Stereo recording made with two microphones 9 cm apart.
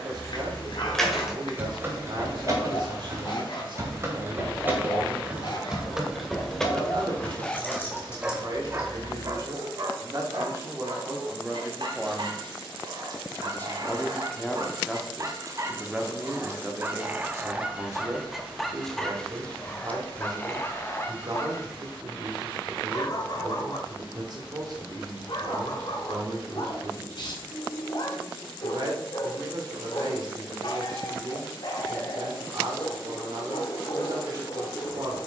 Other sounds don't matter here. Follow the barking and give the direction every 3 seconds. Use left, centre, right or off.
left, left, centre, right, right, right, centre, left, left, left, left, left.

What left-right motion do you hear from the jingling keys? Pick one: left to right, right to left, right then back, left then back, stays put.
right then back.